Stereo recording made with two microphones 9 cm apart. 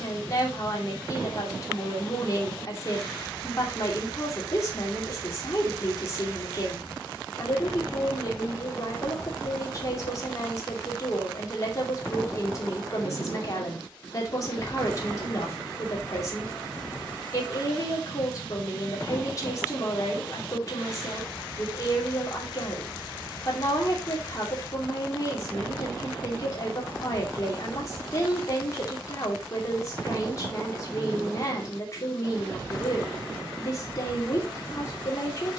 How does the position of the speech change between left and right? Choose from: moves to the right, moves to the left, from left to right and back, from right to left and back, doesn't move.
doesn't move.